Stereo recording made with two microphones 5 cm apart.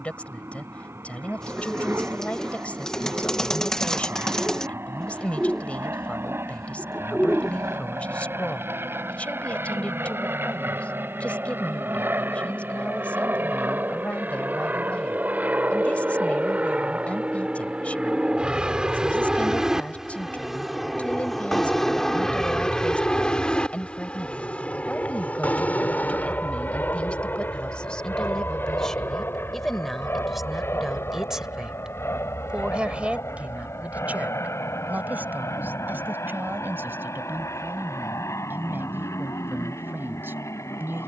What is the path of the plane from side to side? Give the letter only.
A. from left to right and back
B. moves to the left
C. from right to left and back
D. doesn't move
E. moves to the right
B.